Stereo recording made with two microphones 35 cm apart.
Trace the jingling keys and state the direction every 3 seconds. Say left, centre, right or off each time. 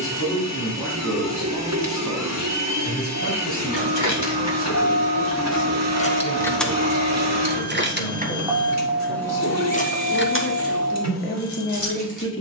off, left, centre, left.